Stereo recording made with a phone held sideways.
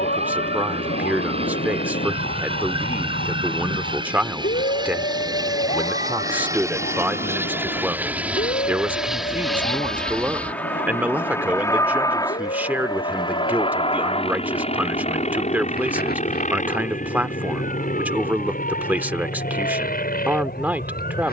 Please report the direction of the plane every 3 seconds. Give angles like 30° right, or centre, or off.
40° right, 30° right, 10° right, 10° left, 30° left, 50° left, 60° left.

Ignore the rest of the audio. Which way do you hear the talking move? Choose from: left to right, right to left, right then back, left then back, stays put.
stays put.